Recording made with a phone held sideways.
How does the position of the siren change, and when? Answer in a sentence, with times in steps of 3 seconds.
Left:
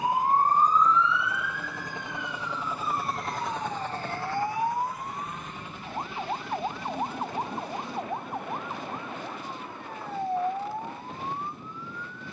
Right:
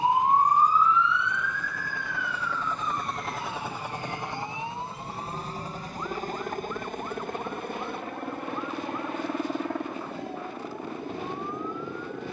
You can hear the siren in the centre from 0 s and on the left from 3 s.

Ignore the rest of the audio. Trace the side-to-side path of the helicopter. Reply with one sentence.
You can hear the helicopter move to the right.